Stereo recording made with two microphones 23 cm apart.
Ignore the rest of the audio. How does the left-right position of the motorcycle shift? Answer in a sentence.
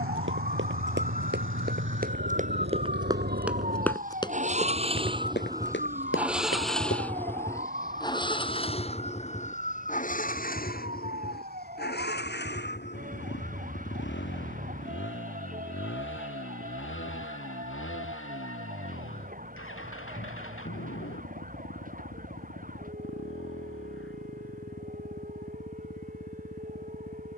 You can hear the motorcycle travel towards the left.